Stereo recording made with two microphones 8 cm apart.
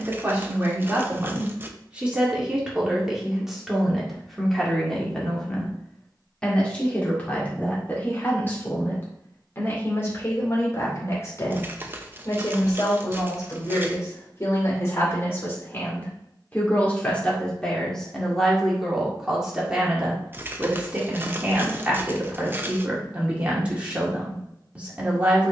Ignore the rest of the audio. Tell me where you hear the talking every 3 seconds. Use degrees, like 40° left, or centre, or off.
20° right, centre, 20° left, 30° left, 40° left, 20° left, 10° right, 20° right, 20° right.